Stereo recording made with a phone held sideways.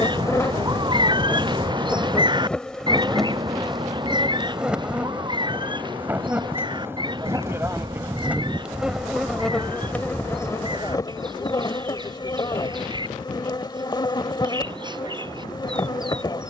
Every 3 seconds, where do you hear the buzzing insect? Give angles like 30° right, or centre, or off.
10° left, 10° right, 10° right, 20° left, 30° left, 30° left.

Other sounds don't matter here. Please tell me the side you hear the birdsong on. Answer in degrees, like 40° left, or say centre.
30° right.